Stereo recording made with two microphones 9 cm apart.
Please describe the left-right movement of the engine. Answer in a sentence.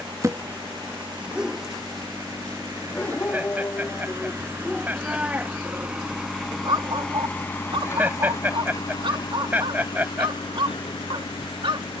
In this clip you hear the engine go from the right side to the left.